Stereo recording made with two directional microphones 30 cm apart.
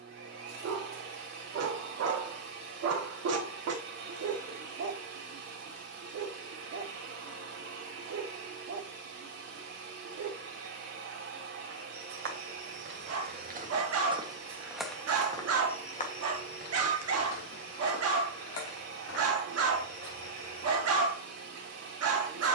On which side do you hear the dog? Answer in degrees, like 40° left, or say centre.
50° right.